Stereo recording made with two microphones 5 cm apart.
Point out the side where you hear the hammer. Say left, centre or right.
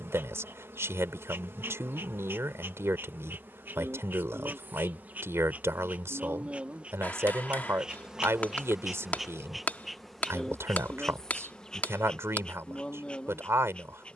left.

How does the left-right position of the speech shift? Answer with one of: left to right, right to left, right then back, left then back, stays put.
stays put.